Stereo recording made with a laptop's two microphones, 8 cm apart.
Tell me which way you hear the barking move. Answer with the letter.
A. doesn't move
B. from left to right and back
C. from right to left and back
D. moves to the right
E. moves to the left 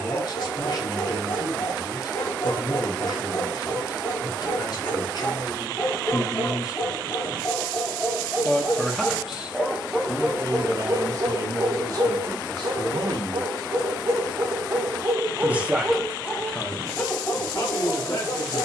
B.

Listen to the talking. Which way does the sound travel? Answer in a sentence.
In this clip you hear the talking move from left to right and back again.